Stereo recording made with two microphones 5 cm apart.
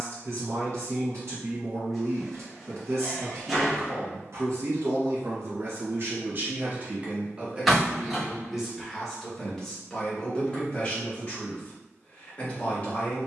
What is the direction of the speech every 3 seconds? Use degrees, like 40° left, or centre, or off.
60° right, 60° right, 20° right, 20° left, 30° left.